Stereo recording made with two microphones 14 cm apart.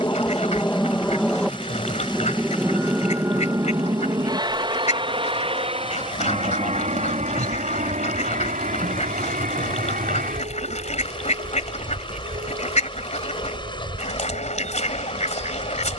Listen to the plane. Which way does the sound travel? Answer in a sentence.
You can hear the plane travel towards the right.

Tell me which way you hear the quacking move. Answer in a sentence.
In this clip you hear the quacking stay put.